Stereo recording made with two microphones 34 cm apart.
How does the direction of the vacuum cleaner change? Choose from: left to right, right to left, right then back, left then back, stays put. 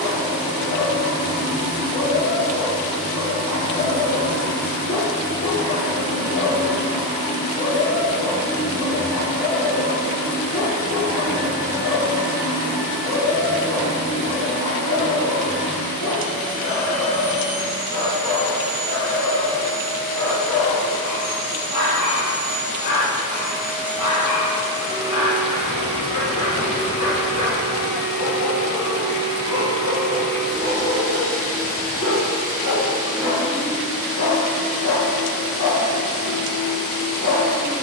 right to left.